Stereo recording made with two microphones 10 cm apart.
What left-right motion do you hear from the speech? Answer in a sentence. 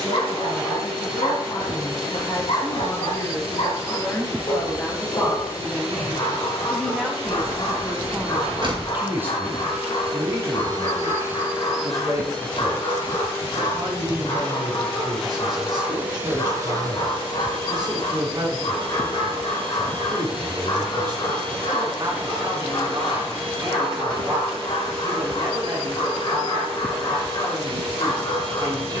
In this clip you hear the speech travel towards the right.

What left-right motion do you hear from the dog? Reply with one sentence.
In this clip you hear the dog stay put.